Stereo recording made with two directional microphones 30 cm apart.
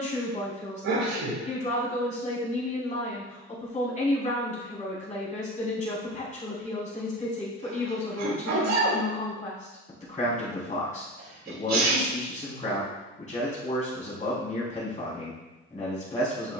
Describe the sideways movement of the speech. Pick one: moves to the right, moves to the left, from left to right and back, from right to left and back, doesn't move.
doesn't move.